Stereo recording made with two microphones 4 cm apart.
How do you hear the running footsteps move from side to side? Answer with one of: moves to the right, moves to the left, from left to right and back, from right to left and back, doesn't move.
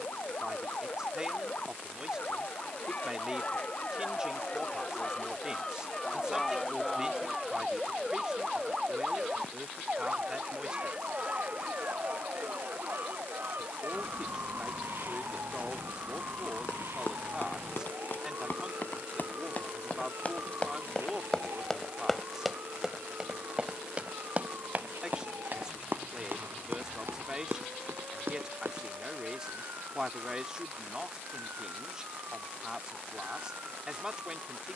moves to the right.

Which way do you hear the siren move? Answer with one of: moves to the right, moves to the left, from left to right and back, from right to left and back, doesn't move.
moves to the right.